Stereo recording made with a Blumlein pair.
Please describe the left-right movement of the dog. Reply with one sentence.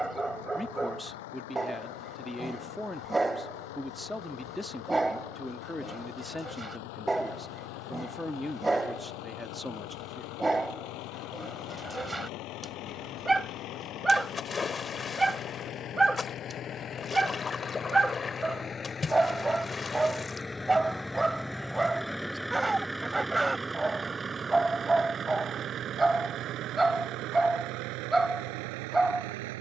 You can hear the dog stay in one place.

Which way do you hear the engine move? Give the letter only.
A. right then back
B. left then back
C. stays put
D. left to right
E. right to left
D.